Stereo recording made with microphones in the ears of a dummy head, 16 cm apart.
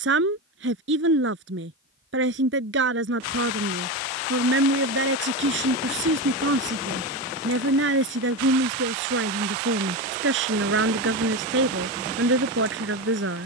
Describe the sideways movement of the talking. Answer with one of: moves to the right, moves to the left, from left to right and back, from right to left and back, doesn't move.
doesn't move.